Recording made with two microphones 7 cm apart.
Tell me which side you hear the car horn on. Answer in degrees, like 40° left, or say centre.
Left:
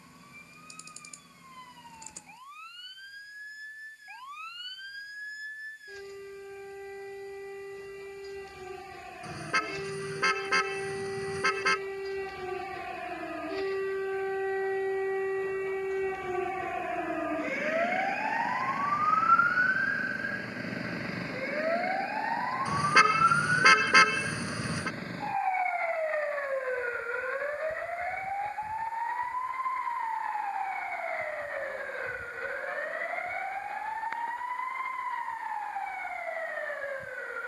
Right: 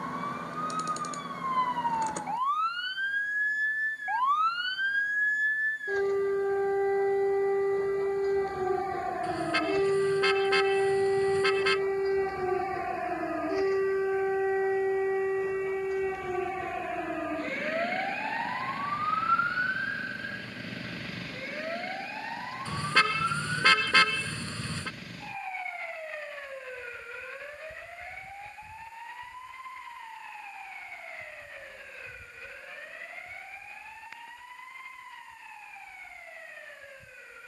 20° left.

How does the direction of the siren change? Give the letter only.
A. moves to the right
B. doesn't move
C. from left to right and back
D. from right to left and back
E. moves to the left
E.